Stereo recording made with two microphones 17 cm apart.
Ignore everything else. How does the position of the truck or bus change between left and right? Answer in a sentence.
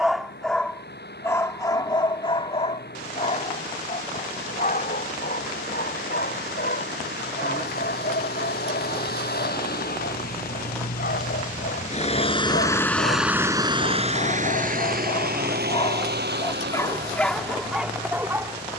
You can hear the truck or bus move from left to right.